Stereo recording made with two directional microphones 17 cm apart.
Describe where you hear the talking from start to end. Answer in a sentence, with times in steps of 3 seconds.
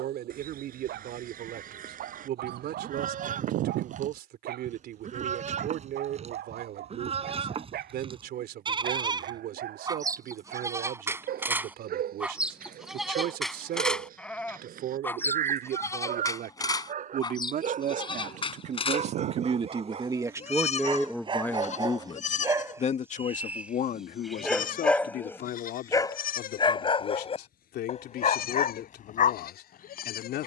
In this clip you hear the talking on the right from 0 s and on the left from 21 s.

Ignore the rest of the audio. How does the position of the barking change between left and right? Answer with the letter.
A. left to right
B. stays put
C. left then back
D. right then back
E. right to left
E.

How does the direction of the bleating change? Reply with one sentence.
You can hear the bleating move from right to left.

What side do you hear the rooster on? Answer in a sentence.
You can hear the rooster on the right.